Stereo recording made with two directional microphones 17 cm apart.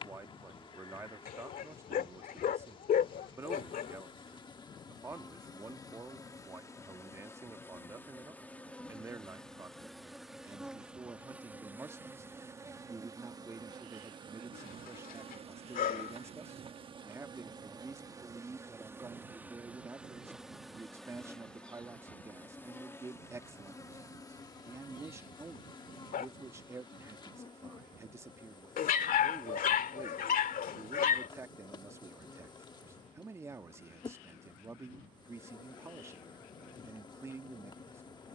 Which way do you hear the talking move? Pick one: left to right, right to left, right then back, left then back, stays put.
stays put.